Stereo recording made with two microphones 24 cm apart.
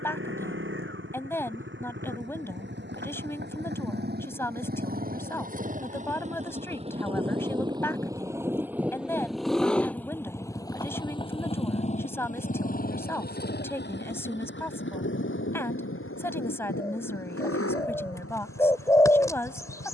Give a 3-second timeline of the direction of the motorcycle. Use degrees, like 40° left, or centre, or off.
50° right, 40° right, 20° right, 10° left, 40° left, 60° left, 70° left.